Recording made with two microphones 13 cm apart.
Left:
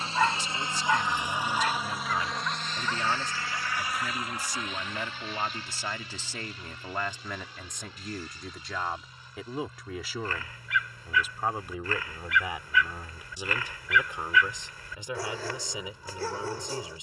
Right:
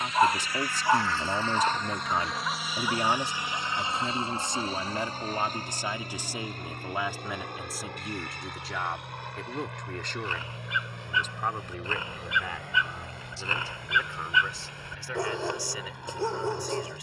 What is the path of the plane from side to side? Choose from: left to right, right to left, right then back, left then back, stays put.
left to right.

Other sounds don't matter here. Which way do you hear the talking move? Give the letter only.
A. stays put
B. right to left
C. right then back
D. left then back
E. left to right
B.